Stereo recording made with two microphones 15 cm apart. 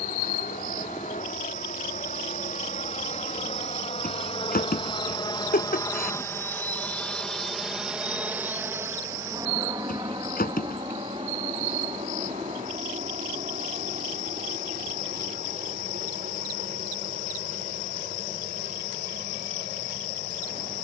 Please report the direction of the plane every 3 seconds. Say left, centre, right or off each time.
left, left, centre, right, right, right, right.